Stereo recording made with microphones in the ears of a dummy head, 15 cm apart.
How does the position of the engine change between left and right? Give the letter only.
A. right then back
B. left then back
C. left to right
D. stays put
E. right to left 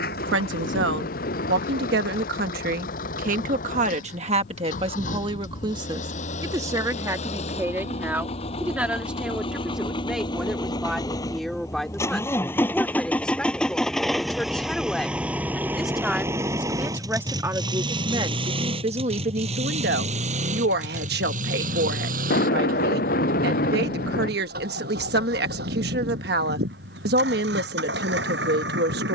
C.